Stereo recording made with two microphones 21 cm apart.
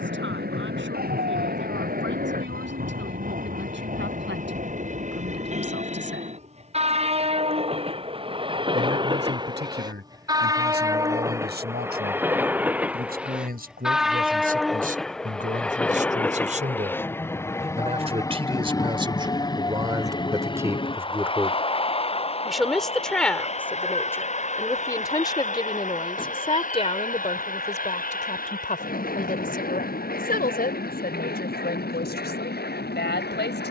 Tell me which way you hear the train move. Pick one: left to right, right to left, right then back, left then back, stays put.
right to left.